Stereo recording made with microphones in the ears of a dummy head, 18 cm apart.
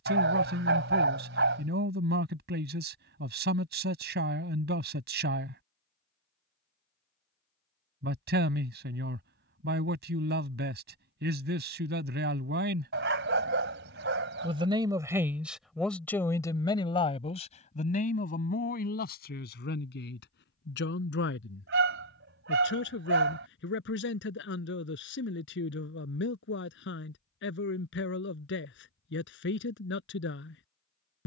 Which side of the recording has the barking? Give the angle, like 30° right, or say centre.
60° right.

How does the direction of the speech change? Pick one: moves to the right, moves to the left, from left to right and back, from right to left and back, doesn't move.
moves to the left.